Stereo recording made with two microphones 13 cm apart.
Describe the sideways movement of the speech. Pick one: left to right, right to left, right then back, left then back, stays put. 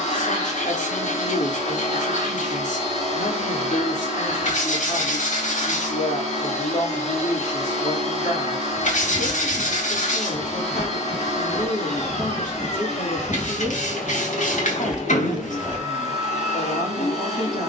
stays put.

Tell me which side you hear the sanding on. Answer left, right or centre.
left.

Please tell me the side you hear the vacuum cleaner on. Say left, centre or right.
left.